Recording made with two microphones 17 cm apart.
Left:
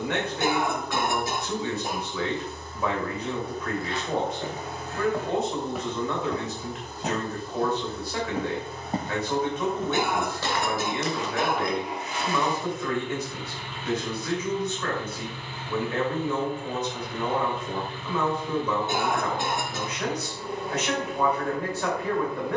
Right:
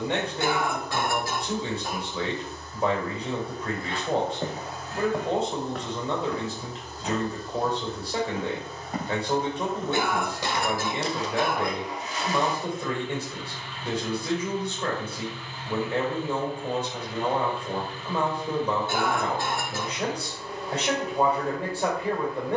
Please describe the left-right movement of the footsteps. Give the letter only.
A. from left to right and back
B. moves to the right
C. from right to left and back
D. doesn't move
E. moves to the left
C.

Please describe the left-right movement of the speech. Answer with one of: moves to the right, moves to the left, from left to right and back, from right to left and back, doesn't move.
doesn't move.